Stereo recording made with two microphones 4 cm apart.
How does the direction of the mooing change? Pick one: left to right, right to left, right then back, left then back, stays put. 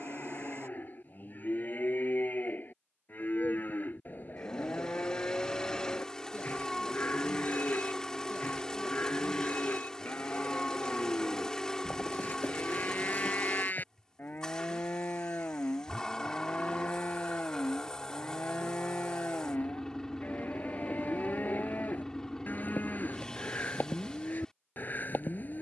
stays put.